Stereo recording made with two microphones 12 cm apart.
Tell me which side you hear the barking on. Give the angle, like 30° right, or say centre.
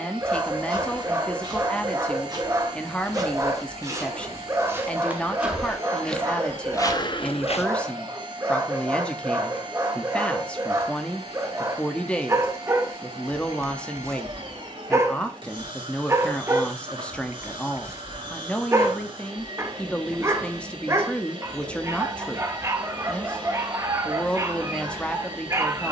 20° right.